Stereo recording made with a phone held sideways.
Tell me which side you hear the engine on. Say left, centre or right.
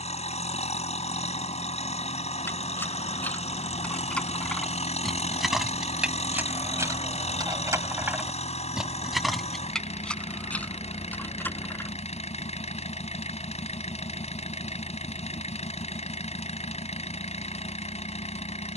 left.